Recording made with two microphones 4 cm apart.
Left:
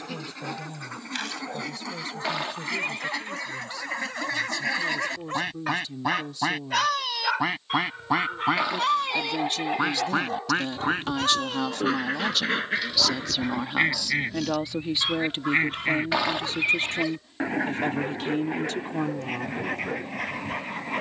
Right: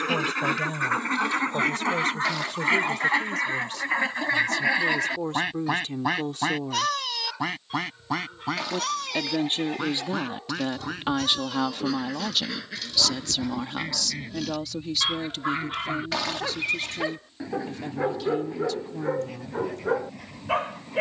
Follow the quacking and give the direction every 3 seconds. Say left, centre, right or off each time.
right, right, centre, left, left, left, left.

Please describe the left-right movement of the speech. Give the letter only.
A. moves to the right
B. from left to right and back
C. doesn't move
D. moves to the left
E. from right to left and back
D.